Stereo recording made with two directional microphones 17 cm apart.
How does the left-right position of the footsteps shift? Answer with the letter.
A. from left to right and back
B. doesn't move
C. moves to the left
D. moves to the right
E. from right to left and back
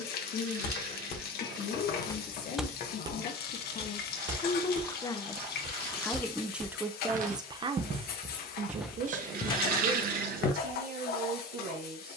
A.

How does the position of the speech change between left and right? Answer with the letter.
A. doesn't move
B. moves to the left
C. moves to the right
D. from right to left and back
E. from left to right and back
C.